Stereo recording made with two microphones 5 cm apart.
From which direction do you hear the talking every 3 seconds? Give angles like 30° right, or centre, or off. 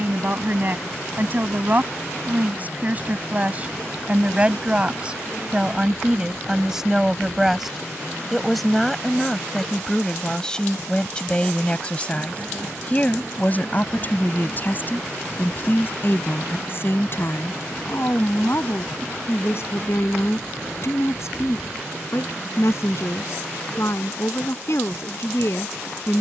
40° right, 20° right, 10° right, 10° left, 30° left, 40° left, 50° left, 60° left, 60° left.